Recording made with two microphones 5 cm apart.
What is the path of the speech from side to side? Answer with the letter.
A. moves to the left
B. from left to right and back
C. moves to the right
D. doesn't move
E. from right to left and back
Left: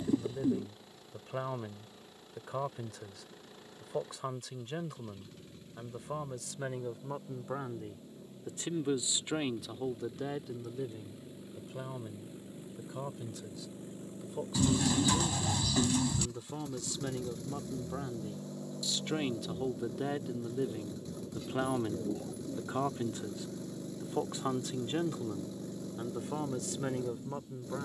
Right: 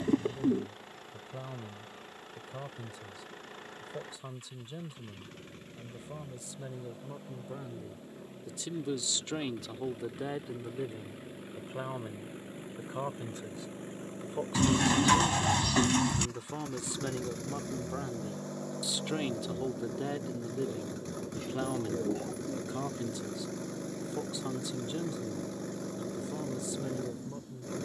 B.